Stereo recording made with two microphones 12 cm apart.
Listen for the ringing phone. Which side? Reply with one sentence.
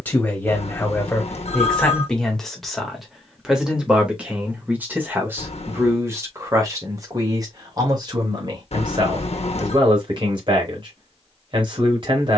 In this clip you hear the ringing phone on the left.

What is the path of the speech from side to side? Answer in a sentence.
You can hear the speech travel towards the right.